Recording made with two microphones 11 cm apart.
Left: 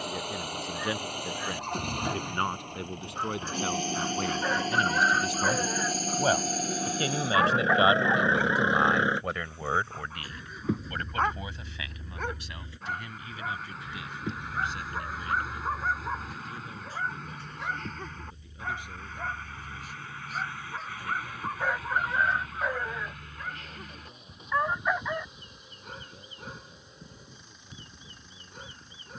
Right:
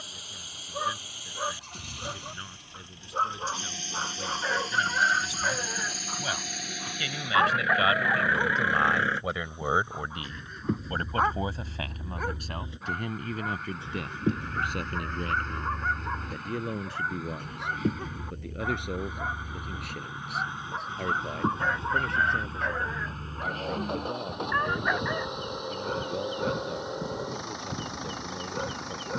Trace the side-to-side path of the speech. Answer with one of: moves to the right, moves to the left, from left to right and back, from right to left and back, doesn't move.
moves to the right.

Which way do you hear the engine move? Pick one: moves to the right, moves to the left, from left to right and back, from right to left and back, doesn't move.
moves to the right.